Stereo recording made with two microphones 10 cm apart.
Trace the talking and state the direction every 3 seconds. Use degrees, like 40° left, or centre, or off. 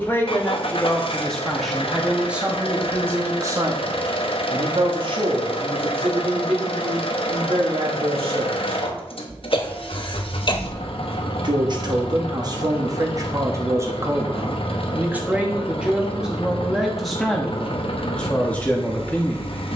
centre, 50° right, 70° right, 50° right, 30° right, 10° right, 10° left.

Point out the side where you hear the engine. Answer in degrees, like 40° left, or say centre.
70° left.